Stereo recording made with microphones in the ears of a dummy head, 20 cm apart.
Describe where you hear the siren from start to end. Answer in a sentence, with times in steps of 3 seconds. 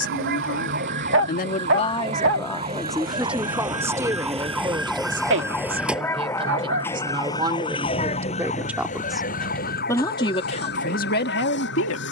You can hear the siren on the right from 0 s, in the centre from 3 s and on the left from 6 s.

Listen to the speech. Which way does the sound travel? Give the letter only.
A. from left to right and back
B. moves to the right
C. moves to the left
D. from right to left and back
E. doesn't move
A.